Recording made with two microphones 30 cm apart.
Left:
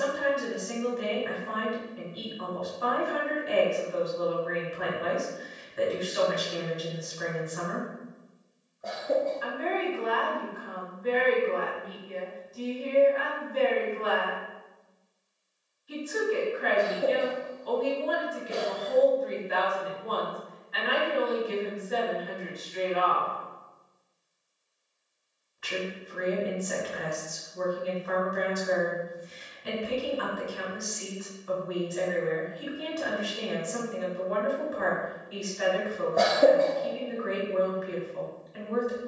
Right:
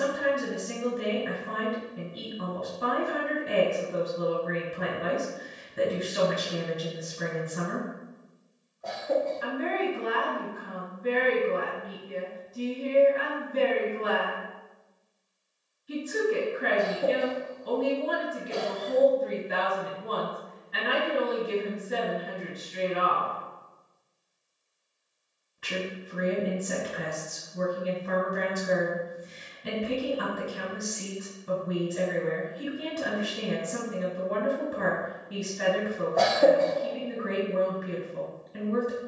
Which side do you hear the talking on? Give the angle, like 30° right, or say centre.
30° right.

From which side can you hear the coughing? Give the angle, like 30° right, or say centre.
20° left.